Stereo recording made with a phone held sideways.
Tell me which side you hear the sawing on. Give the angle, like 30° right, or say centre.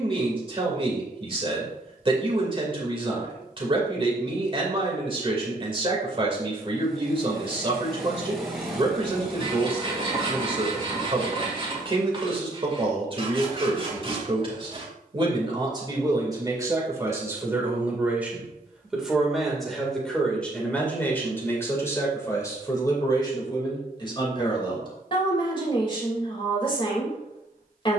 30° right.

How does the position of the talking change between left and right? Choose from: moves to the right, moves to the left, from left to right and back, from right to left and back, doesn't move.
moves to the left.